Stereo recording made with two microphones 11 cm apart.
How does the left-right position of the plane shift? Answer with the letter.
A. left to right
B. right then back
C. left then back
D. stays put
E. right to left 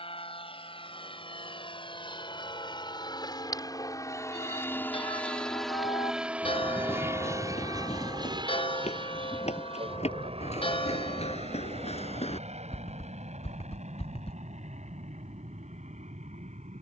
A.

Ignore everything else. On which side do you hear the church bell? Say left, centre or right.
left.